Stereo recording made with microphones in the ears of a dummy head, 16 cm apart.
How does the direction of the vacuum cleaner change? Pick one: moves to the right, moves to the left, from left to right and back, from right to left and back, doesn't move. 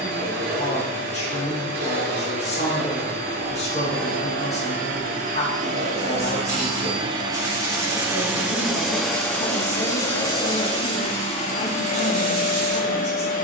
moves to the left.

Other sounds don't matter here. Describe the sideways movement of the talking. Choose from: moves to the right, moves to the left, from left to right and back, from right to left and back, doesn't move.
doesn't move.